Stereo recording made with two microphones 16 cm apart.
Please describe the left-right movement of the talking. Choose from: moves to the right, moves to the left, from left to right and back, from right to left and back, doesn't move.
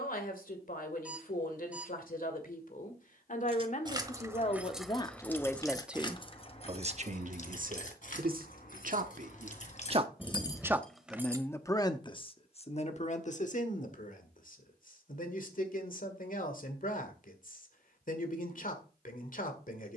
from left to right and back.